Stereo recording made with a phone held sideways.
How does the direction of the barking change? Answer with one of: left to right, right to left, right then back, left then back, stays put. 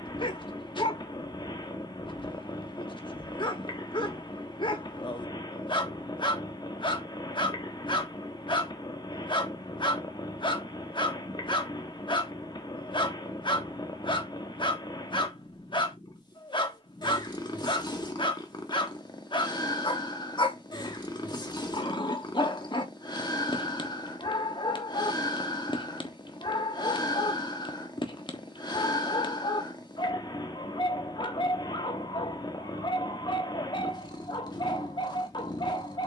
stays put.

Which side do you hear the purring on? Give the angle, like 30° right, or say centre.
30° left.